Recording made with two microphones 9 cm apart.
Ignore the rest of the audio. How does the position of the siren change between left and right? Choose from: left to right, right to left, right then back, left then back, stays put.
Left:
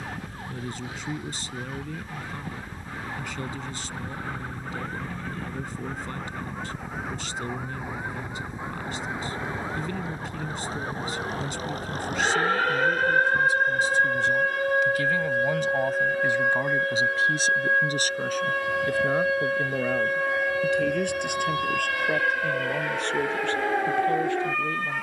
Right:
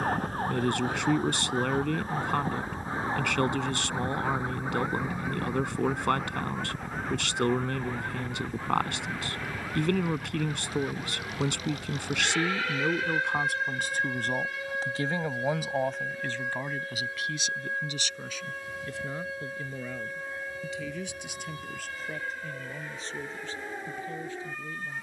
right to left.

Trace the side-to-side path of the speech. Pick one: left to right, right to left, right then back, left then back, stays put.
right to left.